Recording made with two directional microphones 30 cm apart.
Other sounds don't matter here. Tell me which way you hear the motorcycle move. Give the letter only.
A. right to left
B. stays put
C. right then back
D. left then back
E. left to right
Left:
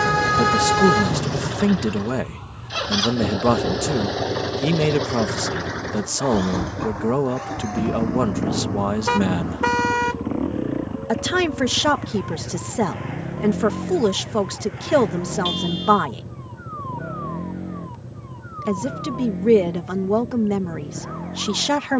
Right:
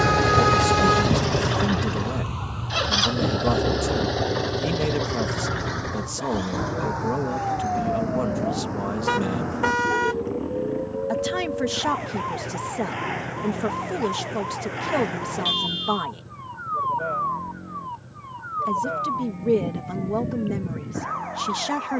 A.